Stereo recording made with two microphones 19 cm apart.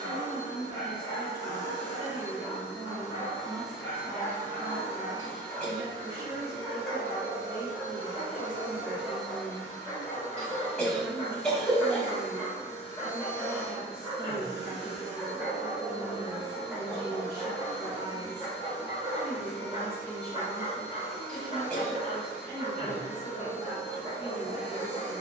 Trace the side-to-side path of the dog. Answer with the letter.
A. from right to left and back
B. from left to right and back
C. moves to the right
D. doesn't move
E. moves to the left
C.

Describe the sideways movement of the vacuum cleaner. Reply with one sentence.
You can hear the vacuum cleaner move from left to right and back again.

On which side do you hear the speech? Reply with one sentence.
You can hear the speech on the right.